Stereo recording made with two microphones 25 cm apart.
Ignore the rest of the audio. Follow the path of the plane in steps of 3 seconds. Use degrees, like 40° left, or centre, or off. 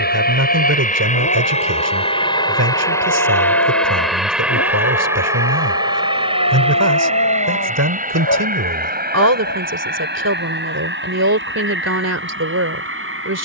30° left, centre, 30° right, 40° right, 50° right.